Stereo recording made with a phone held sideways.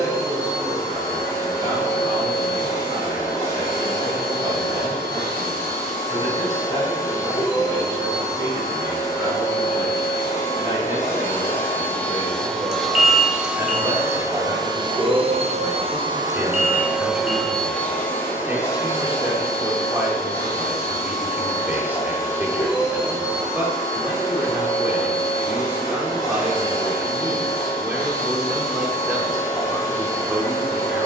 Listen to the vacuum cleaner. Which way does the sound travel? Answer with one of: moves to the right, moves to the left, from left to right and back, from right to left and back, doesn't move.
from left to right and back.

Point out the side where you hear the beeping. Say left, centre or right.
right.